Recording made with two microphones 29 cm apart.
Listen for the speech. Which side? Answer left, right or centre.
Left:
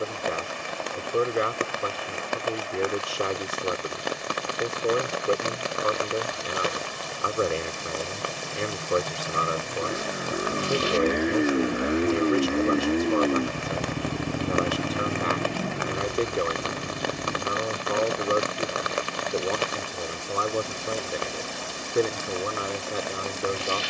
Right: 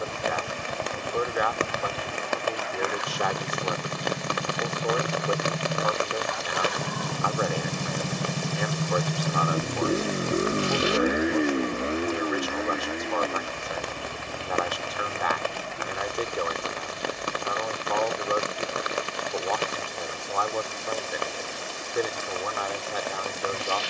left.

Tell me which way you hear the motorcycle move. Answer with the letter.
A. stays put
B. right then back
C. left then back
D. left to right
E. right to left
E.